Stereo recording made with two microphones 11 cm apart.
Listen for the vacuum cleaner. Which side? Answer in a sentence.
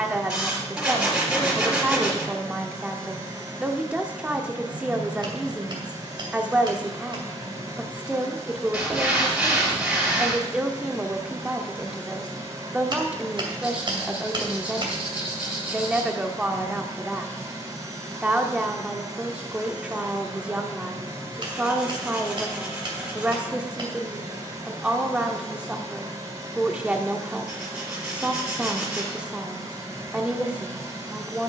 In this clip you hear the vacuum cleaner on the right.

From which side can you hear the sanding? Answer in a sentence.
You can hear the sanding in the centre.